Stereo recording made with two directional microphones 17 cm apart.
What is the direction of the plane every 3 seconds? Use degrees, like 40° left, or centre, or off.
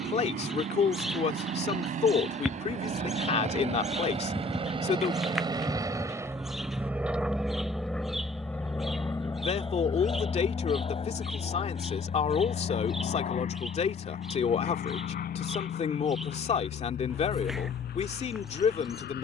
50° right, 30° right, centre, 30° left, 50° left, 60° left, 60° left.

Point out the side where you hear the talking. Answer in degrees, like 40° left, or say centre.
40° left.